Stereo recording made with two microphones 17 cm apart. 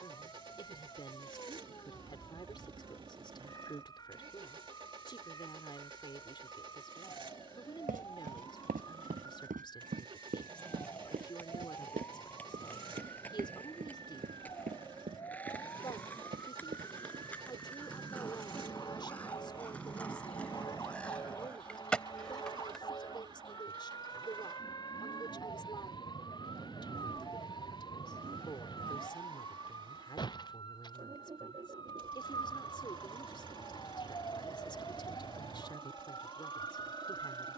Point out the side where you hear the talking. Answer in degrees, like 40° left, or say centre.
30° left.